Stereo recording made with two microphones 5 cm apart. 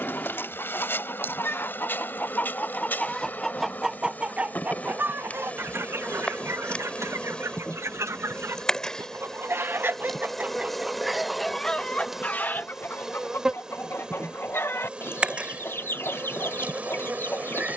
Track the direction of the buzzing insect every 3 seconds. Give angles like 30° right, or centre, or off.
40° left, 30° left, 20° left, centre, 10° right, 30° right.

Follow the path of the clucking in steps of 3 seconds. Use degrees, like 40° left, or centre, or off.
40° left, 20° right, 60° right, 20° right, 50° left, 50° left.